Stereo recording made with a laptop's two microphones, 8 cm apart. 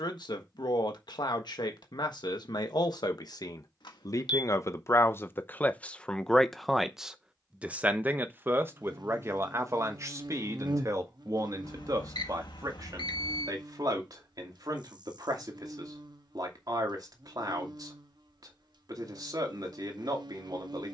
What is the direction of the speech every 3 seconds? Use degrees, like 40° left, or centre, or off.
70° left, 40° left, 10° right, 40° right, 50° right, 60° right, 60° right.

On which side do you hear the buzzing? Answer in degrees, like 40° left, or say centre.
70° right.